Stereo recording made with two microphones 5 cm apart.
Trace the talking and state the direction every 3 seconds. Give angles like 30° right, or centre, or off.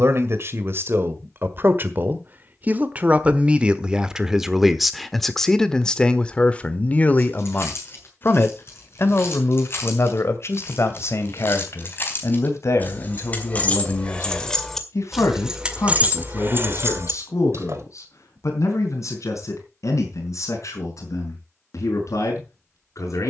40° right, 10° right, 30° left, 60° left, 70° left, 70° left, 80° left, 80° left.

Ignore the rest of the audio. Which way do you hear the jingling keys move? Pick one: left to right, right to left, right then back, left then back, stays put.
left to right.